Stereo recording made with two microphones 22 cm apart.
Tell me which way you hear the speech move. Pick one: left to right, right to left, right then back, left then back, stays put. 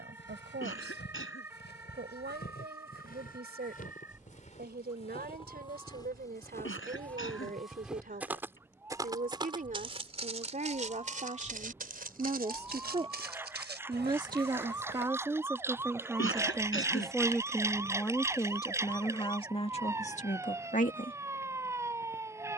right to left.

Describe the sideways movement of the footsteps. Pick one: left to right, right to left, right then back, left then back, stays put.
left to right.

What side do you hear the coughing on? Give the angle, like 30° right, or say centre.
70° left.